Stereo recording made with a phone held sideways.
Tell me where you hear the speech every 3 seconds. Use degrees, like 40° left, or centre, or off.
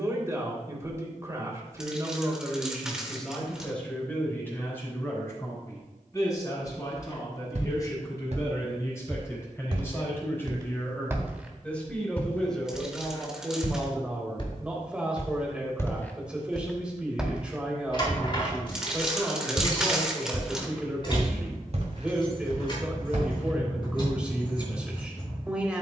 20° right, 10° left, 20° left, 20° left, centre, 10° right, 10° right, 10° right, 10° right.